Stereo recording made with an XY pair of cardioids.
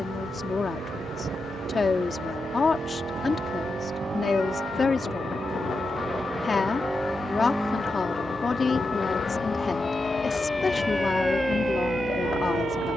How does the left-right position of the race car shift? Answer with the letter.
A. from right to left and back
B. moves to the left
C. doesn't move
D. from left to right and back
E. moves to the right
B.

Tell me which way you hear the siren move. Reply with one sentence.
In this clip you hear the siren move to the right.